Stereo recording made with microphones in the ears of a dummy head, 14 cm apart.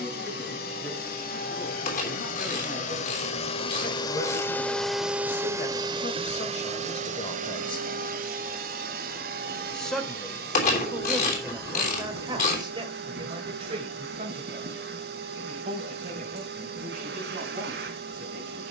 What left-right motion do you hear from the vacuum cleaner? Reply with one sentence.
You can hear the vacuum cleaner move from left to right.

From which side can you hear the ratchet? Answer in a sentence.
You can hear the ratchet on the left.